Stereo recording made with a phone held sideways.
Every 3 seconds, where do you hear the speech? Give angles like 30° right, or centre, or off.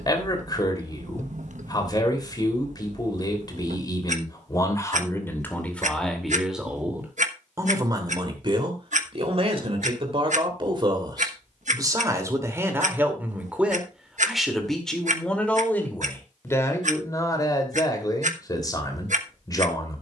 30° left, 20° left, 20° right, 40° right, 10° right, 20° left, 30° left.